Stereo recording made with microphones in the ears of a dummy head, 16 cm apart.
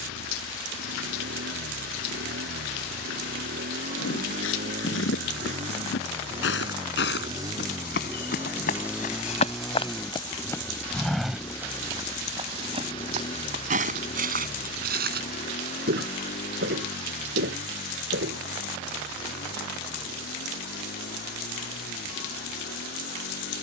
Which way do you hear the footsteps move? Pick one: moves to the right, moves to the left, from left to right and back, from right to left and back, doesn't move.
moves to the right.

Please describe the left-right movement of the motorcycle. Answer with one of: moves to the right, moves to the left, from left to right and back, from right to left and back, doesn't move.
moves to the left.